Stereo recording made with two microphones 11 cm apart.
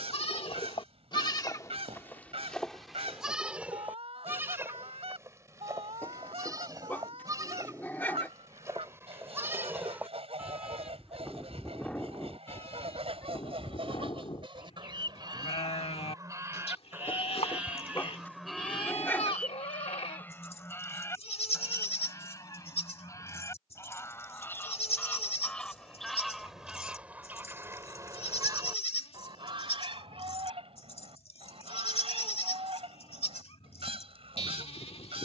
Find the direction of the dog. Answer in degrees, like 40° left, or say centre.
20° left.